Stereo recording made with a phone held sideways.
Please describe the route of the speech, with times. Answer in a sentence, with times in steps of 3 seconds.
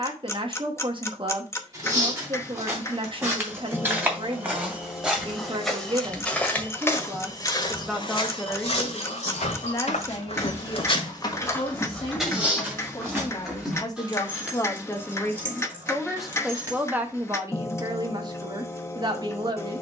In this clip you hear the speech on the right from 0 s, in the centre from 6 s, on the left from 9 s, in the centre from 15 s and on the right from 18 s.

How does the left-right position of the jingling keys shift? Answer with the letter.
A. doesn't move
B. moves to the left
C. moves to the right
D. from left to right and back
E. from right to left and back
C.